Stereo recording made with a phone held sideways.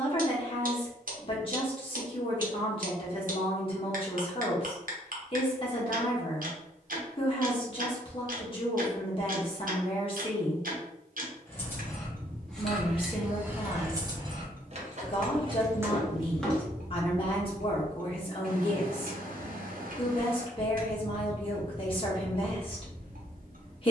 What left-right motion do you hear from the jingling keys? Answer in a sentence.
In this clip you hear the jingling keys go right and come back.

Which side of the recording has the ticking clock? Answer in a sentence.
You can hear the ticking clock on the right.